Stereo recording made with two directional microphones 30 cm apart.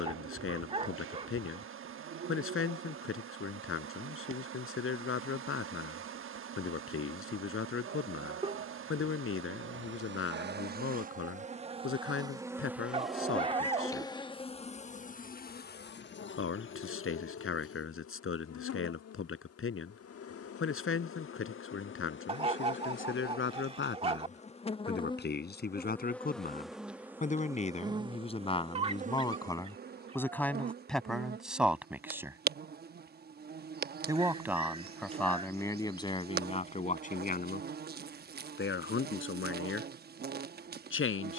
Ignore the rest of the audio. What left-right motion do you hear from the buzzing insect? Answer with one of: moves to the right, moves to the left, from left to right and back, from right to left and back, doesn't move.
from right to left and back.